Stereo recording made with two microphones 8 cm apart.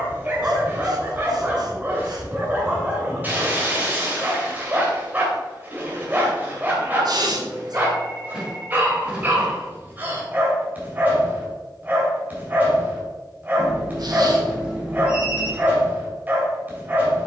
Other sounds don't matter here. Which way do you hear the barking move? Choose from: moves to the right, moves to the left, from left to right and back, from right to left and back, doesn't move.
doesn't move.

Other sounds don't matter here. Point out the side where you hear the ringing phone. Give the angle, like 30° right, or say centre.
10° right.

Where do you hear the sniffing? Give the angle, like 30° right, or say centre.
60° right.